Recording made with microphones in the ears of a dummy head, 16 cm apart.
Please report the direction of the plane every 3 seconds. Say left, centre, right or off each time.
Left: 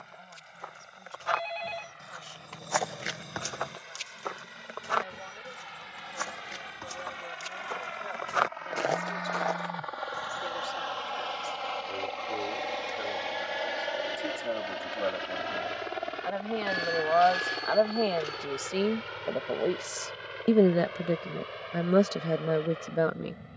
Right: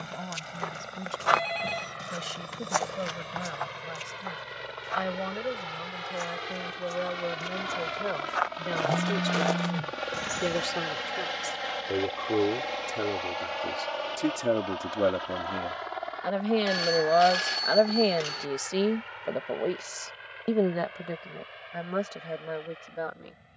right, right, right, right, centre, left, left, left.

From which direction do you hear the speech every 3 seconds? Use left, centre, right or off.
right, right, right, right, right, right, centre, left.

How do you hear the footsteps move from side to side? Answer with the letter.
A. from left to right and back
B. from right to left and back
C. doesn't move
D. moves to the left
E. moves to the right
B.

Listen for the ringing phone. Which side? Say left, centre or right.
right.